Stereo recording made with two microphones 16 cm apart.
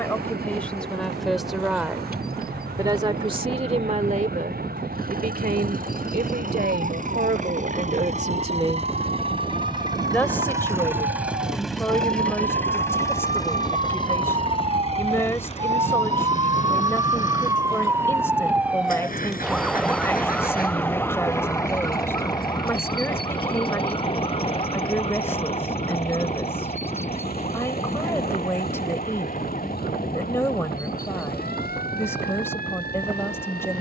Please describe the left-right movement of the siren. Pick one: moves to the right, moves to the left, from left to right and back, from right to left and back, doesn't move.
moves to the left.